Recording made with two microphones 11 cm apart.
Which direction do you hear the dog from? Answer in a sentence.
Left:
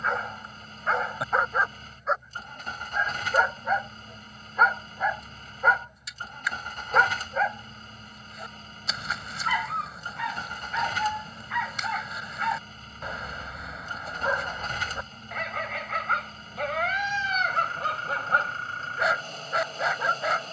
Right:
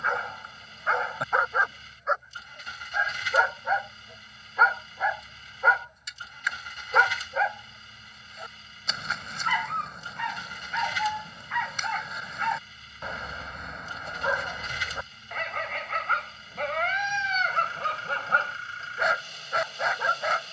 In this clip you hear the dog in the centre.